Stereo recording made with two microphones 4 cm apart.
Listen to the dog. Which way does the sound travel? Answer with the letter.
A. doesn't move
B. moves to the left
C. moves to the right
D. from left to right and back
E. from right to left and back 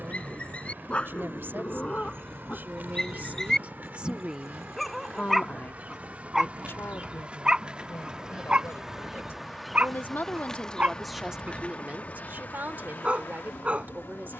C.